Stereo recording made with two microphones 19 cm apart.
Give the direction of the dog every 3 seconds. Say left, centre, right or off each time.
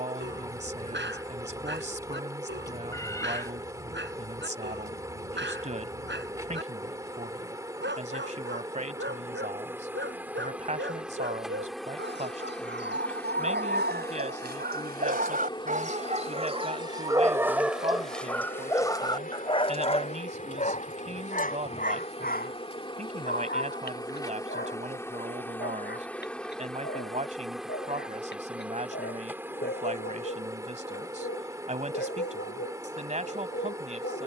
right, right, right, right, right, right, left, left, left, left, left, left.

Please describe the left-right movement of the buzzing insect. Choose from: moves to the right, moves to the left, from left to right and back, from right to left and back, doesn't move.
from right to left and back.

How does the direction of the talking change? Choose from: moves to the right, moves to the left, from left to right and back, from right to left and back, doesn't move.
doesn't move.